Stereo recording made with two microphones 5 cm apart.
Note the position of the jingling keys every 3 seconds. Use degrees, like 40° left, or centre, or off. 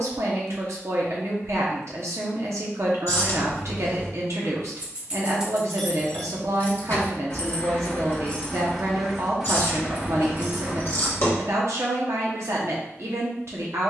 off, 20° right, 30° left, 30° right, off.